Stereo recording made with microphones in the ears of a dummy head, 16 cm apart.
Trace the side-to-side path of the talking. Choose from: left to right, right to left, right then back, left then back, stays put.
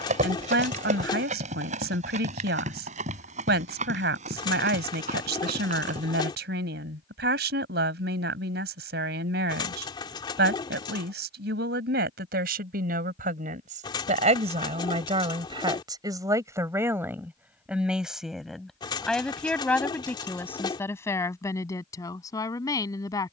right to left.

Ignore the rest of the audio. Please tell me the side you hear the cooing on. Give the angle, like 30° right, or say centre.
30° left.